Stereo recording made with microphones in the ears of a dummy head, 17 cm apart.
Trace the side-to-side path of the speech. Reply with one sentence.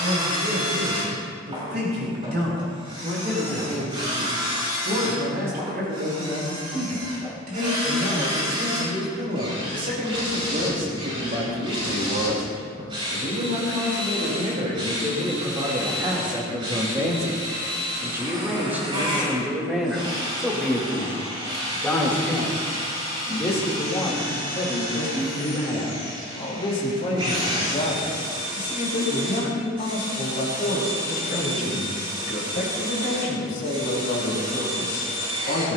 You can hear the speech travel towards the left.